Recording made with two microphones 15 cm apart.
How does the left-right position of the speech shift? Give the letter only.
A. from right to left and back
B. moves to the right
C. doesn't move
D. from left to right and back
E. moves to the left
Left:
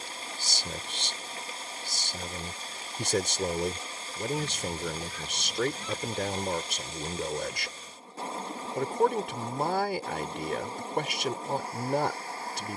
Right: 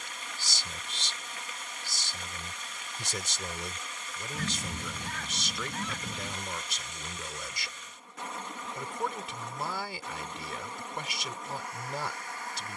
C.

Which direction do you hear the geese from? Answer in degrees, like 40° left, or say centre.
70° right.